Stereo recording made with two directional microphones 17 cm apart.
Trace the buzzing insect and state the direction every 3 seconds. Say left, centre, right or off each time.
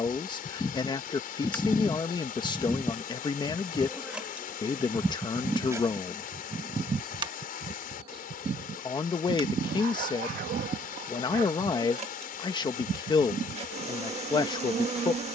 centre, centre, right, right, right.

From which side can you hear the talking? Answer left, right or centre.
left.